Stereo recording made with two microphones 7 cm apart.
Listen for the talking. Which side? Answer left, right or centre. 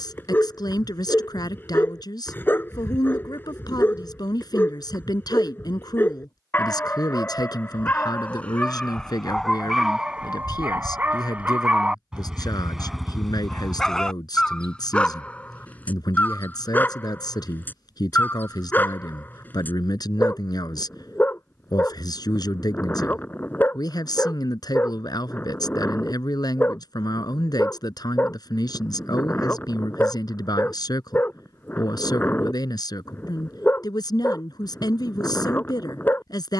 left.